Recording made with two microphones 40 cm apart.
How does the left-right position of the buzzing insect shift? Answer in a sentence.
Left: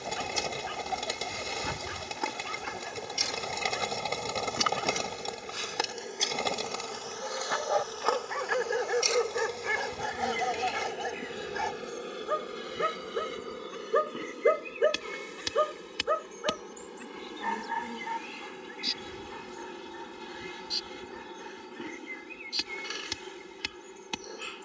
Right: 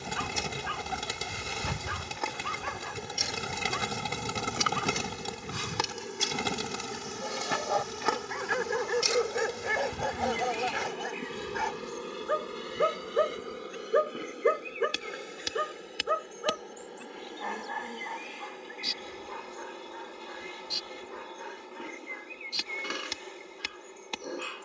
You can hear the buzzing insect go right and come back.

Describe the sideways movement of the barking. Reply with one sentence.
You can hear the barking go left and come back.